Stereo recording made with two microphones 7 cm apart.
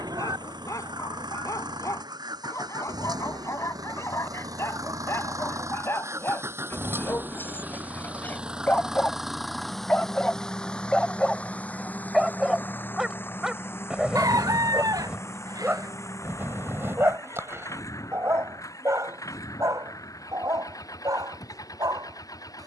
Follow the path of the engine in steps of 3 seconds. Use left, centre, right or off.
right, right, right, centre, left, left, left, left.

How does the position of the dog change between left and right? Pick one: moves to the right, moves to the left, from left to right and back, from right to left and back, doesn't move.
moves to the right.